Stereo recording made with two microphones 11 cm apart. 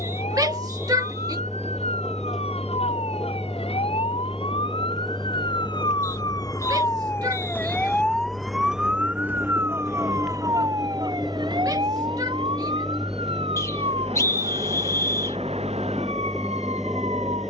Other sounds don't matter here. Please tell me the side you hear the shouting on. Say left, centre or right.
right.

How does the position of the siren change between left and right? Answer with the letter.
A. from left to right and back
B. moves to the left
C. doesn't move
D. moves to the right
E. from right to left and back
D.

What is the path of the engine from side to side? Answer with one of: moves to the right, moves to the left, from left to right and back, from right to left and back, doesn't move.
doesn't move.